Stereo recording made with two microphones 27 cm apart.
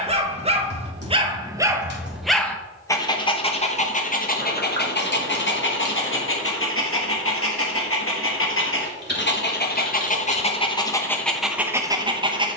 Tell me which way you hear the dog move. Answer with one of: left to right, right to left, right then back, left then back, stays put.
left then back.